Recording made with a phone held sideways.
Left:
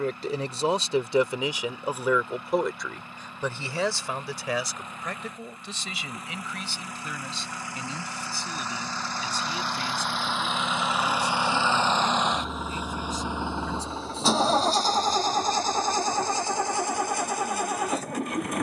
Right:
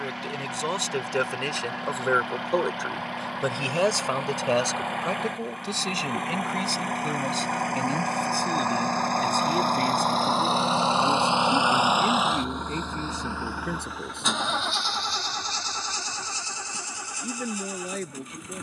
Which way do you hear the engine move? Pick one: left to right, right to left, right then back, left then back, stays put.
right to left.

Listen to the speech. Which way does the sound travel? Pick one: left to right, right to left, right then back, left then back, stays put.
left to right.